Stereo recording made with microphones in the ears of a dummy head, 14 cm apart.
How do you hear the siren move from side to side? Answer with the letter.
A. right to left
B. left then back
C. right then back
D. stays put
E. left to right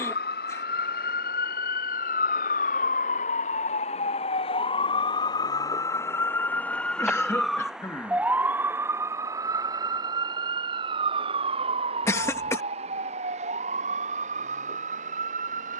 E.